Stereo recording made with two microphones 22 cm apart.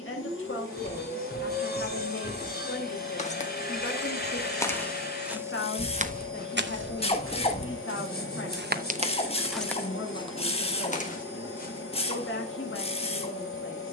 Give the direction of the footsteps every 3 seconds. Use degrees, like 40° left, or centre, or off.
40° left, 10° left, 50° right, 20° left, off.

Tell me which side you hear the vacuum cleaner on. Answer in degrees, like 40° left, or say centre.
70° left.